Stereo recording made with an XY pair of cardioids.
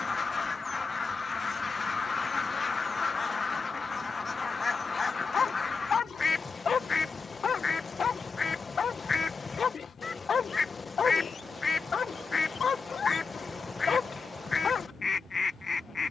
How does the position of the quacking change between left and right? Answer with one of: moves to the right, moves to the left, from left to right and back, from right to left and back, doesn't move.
doesn't move.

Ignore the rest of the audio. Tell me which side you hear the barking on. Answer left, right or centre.
left.